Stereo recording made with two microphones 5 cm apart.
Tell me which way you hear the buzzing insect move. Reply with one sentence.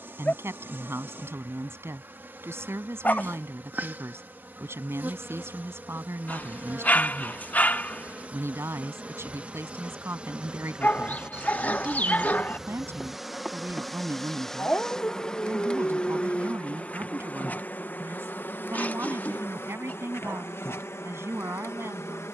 You can hear the buzzing insect travel towards the left.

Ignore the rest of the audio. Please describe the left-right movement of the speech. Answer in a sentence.
You can hear the speech stay in one place.